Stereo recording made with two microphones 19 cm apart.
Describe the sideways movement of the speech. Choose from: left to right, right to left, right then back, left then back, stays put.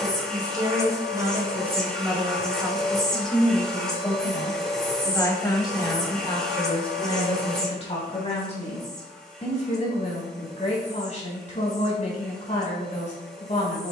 right to left.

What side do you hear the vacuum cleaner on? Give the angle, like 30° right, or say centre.
centre.